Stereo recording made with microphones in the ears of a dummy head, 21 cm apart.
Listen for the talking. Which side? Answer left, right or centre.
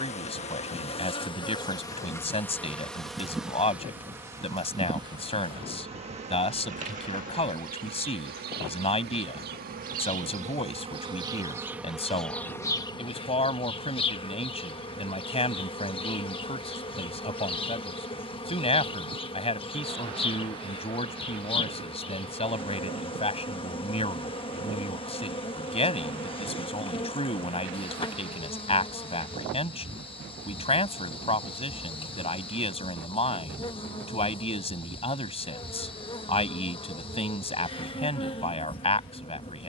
left.